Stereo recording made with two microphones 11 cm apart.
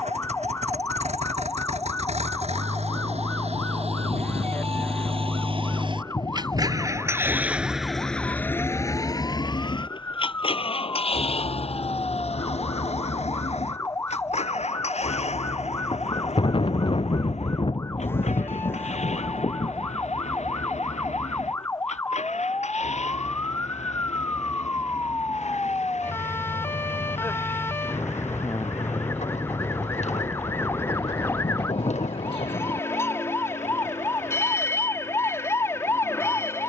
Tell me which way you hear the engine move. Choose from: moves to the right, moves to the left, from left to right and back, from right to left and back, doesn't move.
moves to the left.